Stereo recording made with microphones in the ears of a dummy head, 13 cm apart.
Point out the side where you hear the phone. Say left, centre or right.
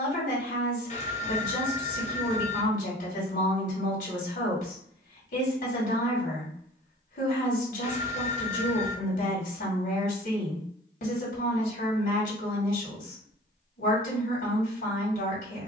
left.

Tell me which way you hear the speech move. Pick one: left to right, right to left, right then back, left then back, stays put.
stays put.